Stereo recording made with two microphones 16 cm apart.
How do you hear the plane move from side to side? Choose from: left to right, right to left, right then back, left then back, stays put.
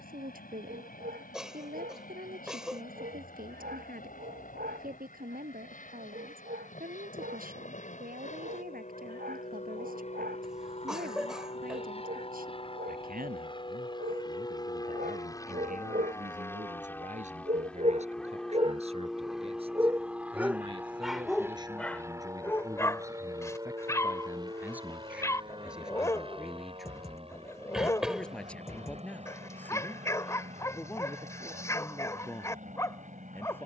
left to right.